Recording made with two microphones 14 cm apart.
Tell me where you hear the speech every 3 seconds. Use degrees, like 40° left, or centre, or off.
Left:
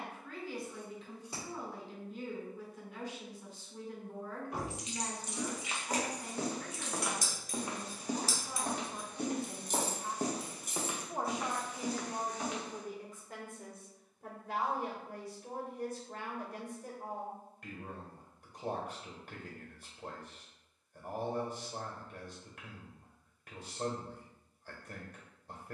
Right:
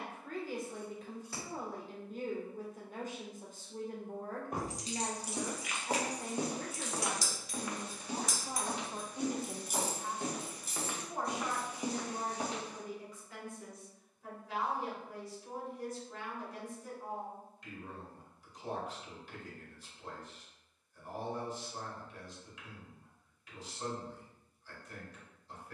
50° right, 50° right, 40° right, 10° left, 50° left, 60° left, 60° left, 60° left, 60° left.